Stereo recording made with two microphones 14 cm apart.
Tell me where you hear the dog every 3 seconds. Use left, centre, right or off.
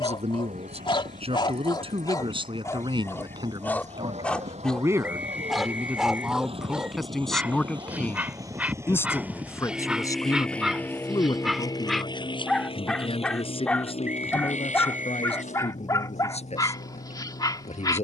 left, centre, centre, centre, centre, left.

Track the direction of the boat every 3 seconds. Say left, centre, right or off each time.
right, right, right, centre, left, left.